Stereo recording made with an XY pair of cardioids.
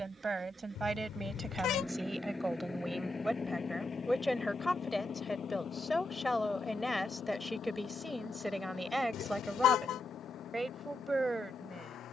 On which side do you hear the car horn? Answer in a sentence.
You can hear the car horn on the left.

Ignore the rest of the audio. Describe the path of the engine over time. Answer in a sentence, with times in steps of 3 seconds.
You can hear the engine in the centre from 0 s and on the left from 3 s.